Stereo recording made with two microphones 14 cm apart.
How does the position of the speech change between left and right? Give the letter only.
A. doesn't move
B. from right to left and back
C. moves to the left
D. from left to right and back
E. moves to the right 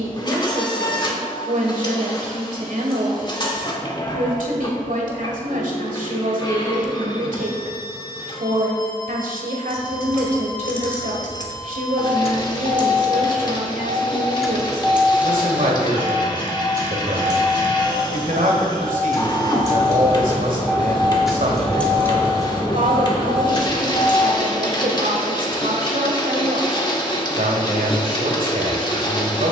A.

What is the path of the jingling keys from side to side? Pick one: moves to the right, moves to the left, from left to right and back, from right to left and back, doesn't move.
from left to right and back.